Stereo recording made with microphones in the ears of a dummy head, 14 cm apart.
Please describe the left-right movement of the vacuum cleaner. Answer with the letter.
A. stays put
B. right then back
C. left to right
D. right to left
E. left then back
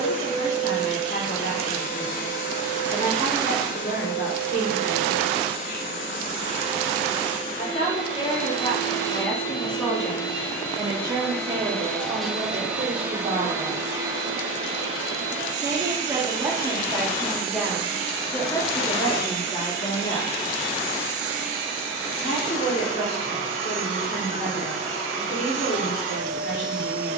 C.